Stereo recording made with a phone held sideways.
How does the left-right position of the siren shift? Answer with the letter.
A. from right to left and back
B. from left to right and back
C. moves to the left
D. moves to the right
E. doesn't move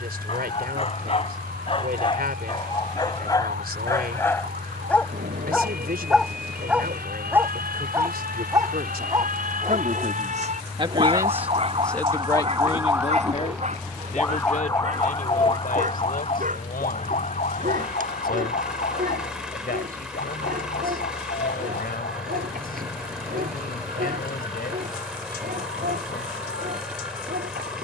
C.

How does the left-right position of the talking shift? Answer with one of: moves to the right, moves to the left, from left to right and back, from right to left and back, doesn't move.
moves to the left.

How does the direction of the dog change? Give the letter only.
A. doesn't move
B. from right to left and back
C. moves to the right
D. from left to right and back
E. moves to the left
C.